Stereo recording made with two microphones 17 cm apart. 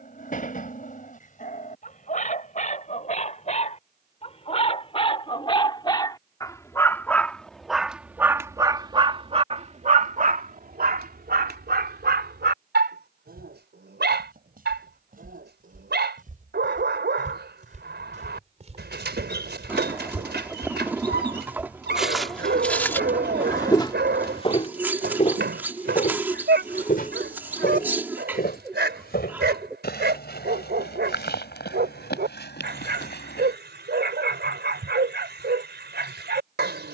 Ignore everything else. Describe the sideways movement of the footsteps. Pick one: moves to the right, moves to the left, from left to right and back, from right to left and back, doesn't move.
moves to the left.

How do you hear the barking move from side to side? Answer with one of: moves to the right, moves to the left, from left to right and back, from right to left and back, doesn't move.
moves to the right.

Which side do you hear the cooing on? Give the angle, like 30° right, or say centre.
10° right.